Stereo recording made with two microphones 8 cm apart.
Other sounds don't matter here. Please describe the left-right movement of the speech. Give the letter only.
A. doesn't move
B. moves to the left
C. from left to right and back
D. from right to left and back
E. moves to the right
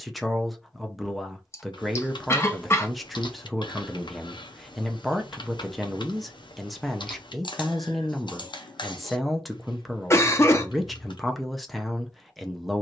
A.